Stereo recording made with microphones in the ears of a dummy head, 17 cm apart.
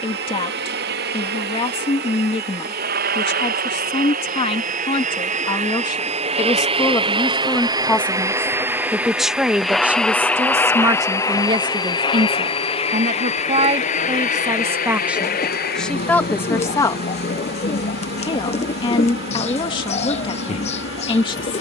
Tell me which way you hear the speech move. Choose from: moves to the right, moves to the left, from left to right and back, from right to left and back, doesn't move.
from left to right and back.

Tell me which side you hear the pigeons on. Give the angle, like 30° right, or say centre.
30° left.